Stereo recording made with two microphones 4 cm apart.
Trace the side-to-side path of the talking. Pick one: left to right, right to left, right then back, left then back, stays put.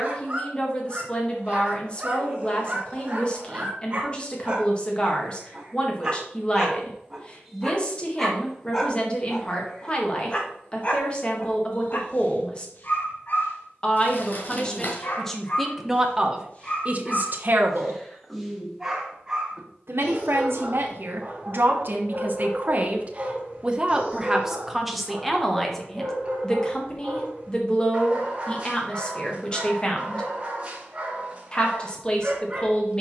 right then back.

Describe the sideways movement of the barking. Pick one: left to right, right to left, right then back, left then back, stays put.
left then back.